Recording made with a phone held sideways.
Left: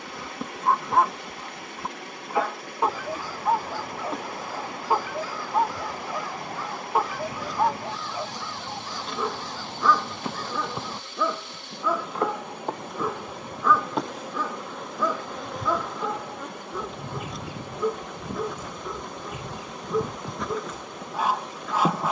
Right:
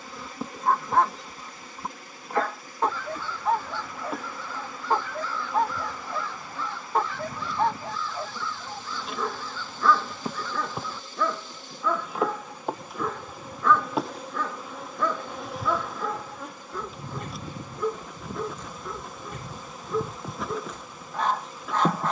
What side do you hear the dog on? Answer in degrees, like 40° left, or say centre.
10° left.